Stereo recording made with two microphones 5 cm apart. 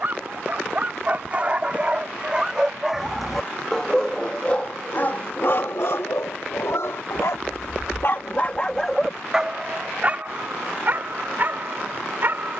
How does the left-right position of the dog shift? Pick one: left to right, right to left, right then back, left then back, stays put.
left then back.